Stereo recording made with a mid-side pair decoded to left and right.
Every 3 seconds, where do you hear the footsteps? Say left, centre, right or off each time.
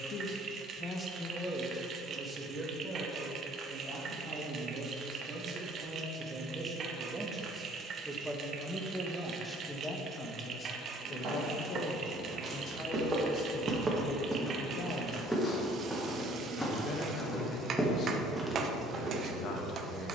off, off, off, right, right, centre, right.